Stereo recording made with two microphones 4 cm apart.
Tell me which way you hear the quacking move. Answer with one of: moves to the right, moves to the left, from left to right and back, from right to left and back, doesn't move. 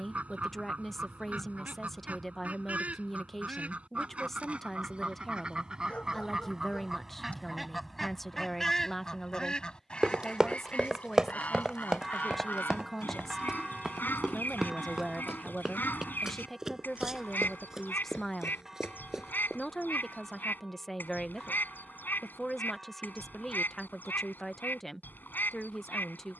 moves to the left.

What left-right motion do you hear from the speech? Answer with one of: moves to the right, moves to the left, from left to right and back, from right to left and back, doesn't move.
doesn't move.